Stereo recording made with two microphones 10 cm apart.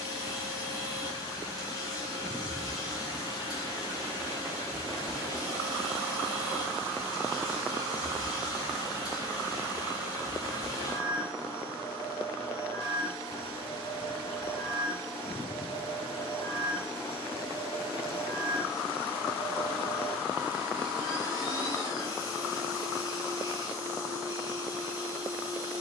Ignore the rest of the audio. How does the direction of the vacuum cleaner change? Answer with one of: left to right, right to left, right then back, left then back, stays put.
stays put.